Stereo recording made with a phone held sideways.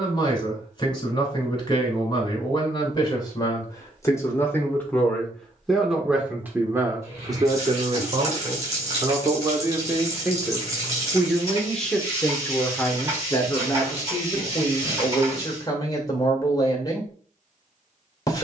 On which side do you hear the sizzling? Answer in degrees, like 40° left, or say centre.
20° right.